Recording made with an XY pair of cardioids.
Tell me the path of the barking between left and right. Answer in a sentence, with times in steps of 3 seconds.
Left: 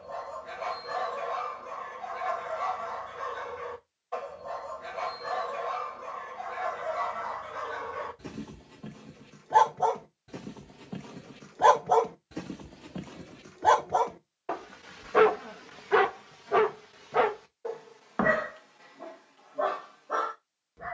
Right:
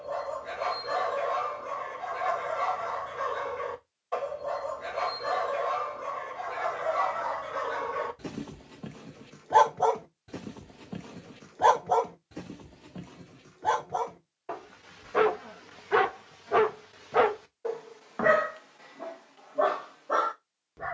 You can hear the barking on the right from 0 s, in the centre from 9 s, on the left from 12 s, in the centre from 15 s and on the right from 18 s.